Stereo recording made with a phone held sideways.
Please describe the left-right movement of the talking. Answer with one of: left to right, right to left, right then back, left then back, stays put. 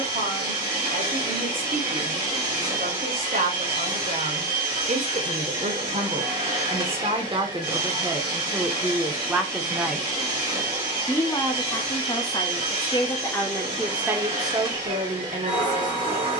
left then back.